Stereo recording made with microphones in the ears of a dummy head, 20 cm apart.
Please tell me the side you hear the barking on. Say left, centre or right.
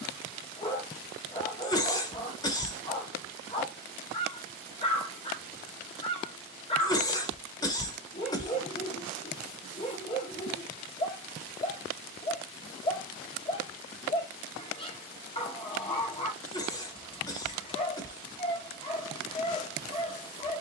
left.